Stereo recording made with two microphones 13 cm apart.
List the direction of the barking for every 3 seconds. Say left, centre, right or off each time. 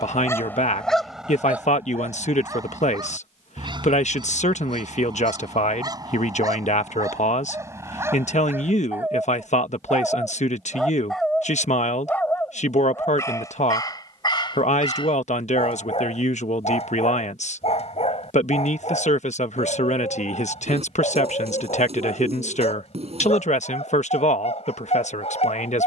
centre, right, right, centre, left, left, left, left, left.